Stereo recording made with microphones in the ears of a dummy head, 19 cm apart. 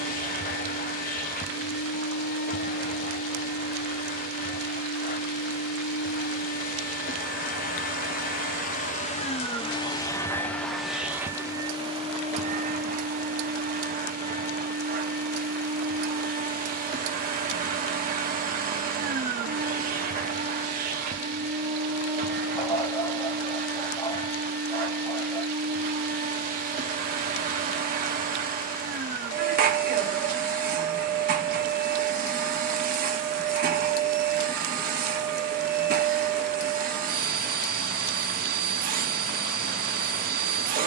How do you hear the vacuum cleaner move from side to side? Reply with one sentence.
You can hear the vacuum cleaner travel towards the right.